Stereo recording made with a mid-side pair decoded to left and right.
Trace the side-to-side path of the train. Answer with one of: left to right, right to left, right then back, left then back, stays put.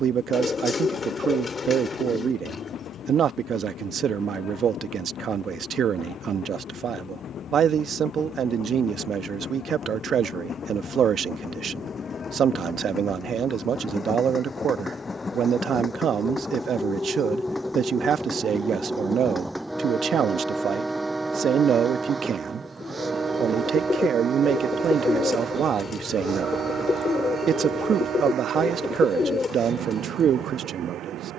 left to right.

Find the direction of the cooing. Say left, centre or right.
left.